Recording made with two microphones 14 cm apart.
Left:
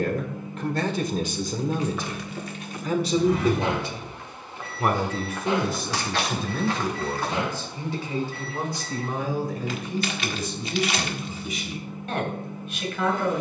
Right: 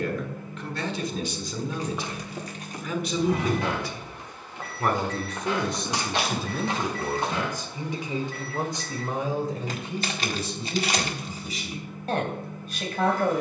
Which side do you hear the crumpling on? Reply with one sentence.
In this clip you hear the crumpling on the right.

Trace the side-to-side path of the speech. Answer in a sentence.
You can hear the speech go from the left side to the right.